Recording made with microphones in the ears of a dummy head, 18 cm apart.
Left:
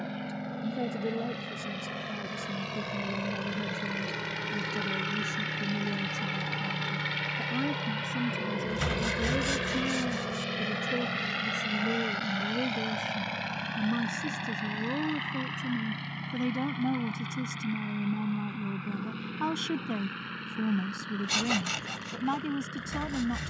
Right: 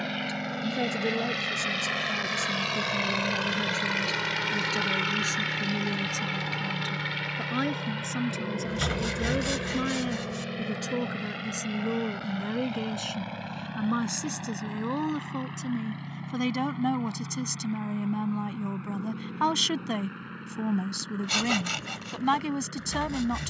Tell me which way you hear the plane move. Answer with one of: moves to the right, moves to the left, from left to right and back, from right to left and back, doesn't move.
moves to the left.